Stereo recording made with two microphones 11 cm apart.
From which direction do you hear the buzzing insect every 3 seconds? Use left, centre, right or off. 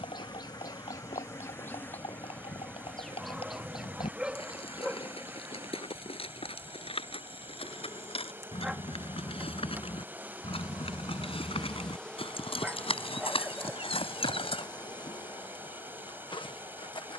left, centre, right, centre, left, left.